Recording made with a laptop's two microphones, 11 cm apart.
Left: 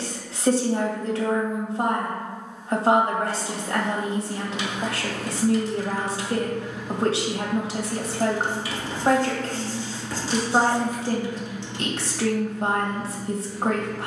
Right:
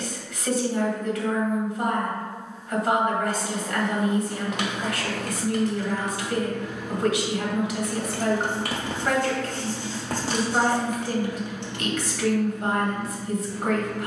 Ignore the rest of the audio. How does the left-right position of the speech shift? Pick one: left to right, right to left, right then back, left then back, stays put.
stays put.